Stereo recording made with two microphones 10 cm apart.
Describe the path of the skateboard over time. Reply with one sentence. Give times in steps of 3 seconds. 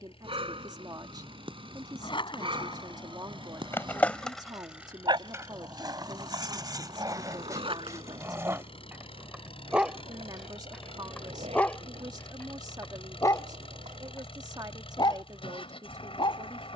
In this clip you hear the skateboard on the left from 0 s, in the centre from 3 s, on the right from 6 s and not at all from 15 s.